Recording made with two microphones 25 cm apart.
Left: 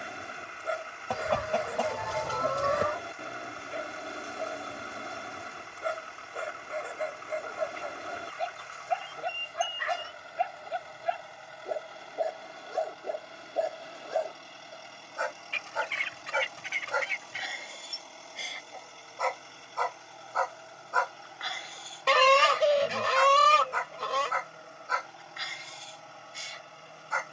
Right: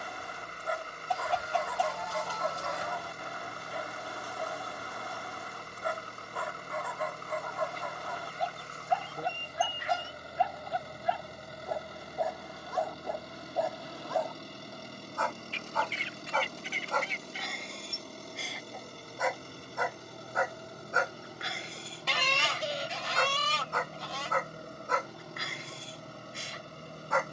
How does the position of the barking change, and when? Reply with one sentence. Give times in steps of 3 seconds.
In this clip you hear the barking on the left from 0 s, in the centre from 15 s and on the right from 21 s.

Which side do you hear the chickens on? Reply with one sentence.
You can hear the chickens on the left.